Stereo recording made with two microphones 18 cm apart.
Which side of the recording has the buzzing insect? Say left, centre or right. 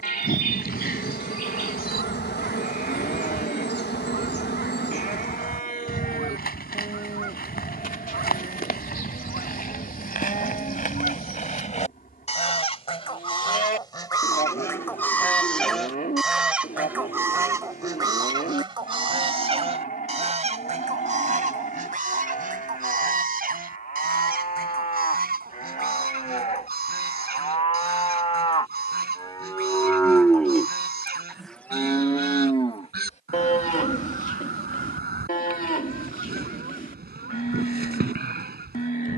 left.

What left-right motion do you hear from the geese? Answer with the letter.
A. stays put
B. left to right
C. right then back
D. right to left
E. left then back
B.